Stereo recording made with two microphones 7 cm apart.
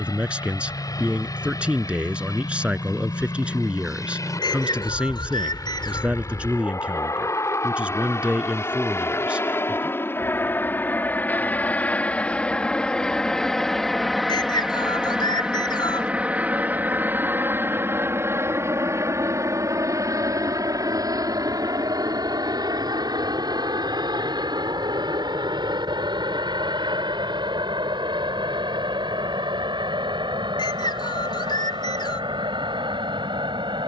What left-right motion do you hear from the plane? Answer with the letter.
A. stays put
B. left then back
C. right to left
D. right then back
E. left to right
E.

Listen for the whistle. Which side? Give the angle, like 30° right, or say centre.
80° left.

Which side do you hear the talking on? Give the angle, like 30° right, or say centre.
20° right.